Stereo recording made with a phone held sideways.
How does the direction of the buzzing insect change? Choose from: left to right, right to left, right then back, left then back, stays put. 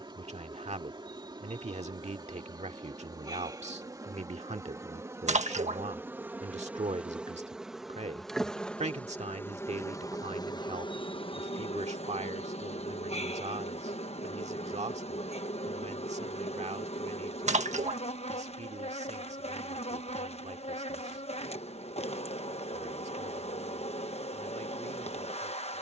right to left.